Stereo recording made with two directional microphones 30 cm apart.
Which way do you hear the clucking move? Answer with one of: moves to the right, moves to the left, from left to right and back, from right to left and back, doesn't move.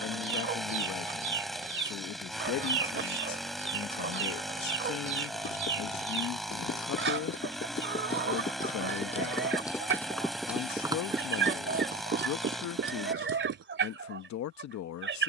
doesn't move.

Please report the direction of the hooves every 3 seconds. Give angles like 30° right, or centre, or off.
off, 50° left, 40° left, centre, 40° right.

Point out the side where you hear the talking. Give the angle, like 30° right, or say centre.
60° left.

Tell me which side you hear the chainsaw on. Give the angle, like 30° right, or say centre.
centre.